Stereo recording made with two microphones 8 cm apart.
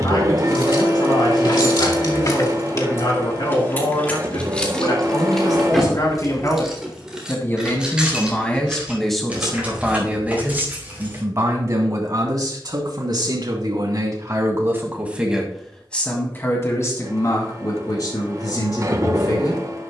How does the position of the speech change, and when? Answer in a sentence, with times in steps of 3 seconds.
You can hear the speech on the left from 0 s, on the right from 9 s and on the left from 15 s.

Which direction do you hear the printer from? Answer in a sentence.
In this clip you hear the printer on the right.